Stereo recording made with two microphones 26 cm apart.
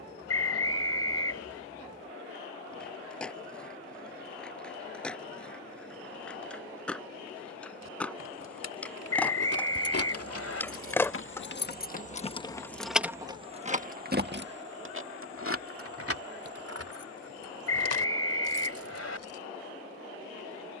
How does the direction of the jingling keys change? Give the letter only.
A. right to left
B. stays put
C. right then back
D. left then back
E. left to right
E.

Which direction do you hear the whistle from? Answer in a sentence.
In this clip you hear the whistle on the left.